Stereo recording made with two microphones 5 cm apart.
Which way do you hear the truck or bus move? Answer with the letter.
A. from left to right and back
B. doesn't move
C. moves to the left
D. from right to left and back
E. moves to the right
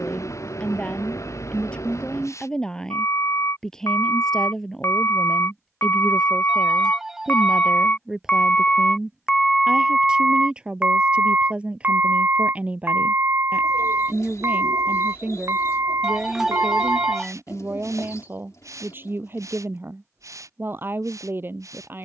E.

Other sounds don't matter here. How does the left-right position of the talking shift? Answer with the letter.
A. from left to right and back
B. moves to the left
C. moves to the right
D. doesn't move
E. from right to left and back
C.